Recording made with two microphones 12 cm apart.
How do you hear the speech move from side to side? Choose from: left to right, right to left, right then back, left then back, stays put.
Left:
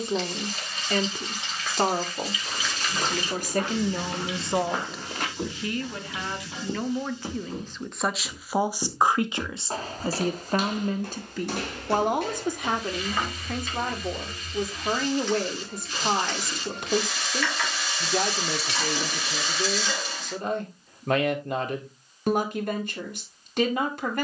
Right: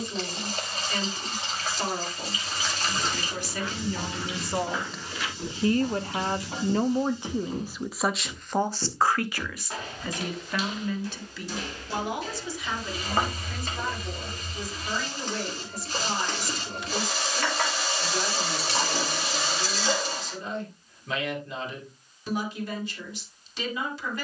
right then back.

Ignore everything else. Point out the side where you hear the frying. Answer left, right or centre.
right.